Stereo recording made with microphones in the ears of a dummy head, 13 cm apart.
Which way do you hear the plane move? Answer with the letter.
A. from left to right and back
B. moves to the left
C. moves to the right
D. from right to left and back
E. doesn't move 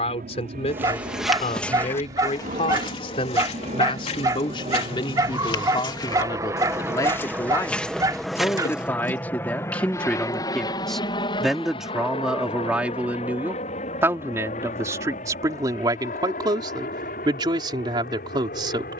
B.